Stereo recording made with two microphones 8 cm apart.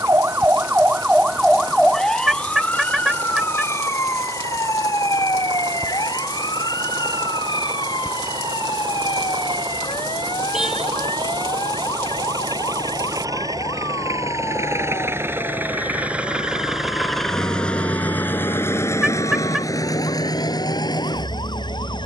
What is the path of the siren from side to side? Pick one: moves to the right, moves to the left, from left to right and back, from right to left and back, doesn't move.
moves to the left.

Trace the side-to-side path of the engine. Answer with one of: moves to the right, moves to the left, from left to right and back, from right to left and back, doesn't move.
moves to the left.